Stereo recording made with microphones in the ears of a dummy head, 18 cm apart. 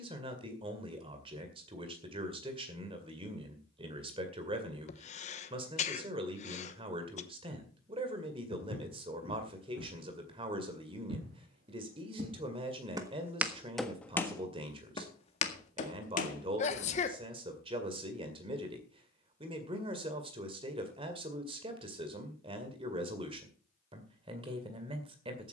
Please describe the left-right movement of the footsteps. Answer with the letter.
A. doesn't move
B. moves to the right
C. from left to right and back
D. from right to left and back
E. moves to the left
E.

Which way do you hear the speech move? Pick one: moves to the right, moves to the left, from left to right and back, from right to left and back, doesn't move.
doesn't move.